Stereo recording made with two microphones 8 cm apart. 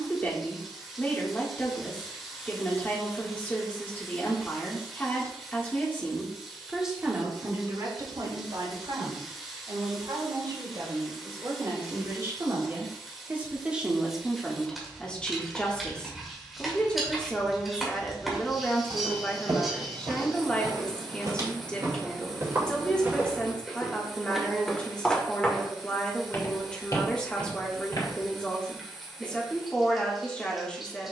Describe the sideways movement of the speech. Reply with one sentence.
You can hear the speech go right and come back.